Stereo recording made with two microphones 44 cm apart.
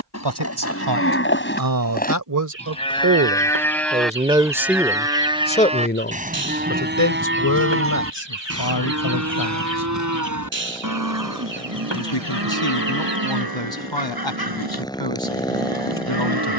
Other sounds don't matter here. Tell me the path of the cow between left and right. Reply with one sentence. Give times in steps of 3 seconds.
You can hear the cow on the left from 0 s, in the centre from 3 s and on the right from 6 s.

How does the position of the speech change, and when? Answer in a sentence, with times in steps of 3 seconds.
You can hear the speech on the right from 0 s, in the centre from 3 s and on the left from 6 s.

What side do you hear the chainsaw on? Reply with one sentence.
In this clip you hear the chainsaw in the centre.